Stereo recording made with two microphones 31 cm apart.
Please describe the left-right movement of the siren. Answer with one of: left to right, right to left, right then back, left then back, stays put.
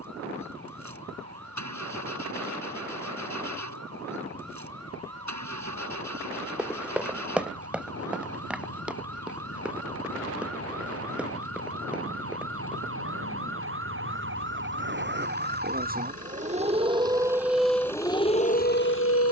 right to left.